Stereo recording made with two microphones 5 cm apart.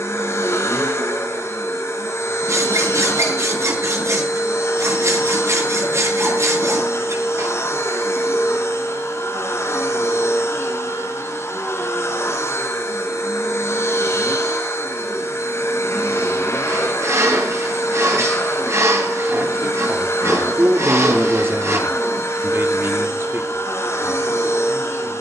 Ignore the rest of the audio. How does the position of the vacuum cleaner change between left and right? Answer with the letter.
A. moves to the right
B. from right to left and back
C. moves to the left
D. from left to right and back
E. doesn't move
E.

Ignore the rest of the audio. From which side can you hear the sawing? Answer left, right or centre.
right.